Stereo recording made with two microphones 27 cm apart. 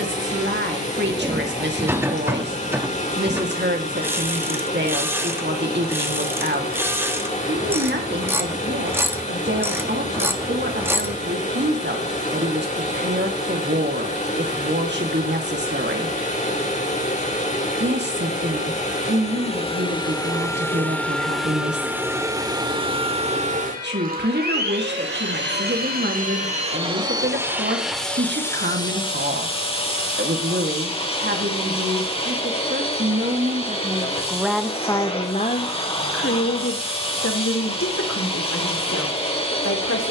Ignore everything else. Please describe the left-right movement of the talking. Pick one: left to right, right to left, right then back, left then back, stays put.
right to left.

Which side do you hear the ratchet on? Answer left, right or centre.
centre.